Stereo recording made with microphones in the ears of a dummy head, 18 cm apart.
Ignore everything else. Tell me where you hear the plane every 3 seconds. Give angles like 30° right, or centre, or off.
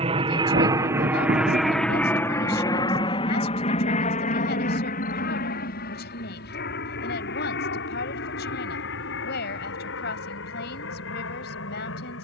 centre, 40° left, 50° left, 60° left.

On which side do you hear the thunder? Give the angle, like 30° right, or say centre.
40° right.